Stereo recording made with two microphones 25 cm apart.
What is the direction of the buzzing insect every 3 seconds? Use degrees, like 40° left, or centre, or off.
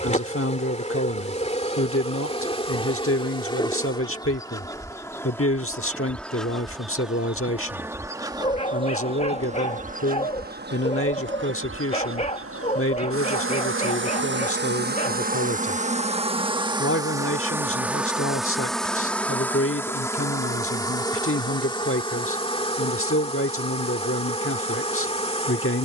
30° left, 10° left, 10° right, 40° right, 50° right, 20° right, 10° left, 20° left, 20° left.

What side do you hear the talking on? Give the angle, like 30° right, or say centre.
60° left.